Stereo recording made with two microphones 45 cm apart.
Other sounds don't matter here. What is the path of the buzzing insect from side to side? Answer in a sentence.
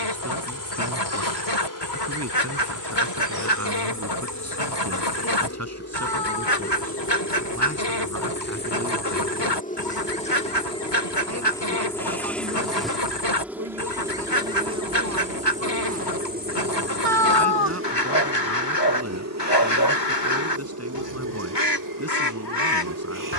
In this clip you hear the buzzing insect move from left to right.